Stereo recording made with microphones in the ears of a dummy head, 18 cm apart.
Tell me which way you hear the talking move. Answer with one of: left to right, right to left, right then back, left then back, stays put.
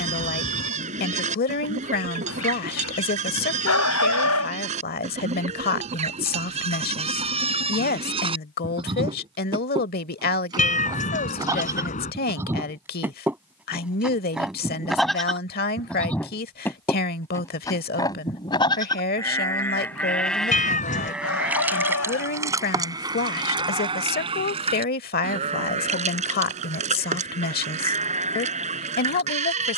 stays put.